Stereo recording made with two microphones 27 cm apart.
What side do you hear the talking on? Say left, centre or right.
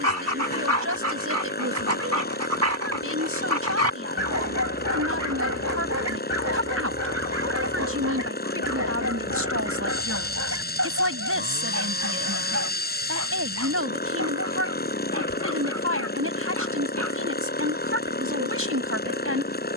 right.